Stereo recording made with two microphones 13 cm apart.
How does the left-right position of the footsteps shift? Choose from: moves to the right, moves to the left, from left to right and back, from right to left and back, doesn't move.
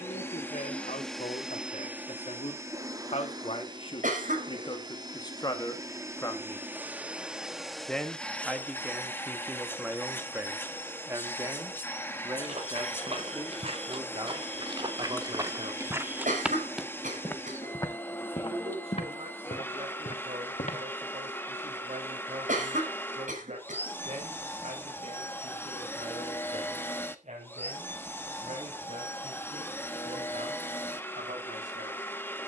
moves to the left.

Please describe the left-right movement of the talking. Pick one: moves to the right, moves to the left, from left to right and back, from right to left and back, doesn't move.
moves to the right.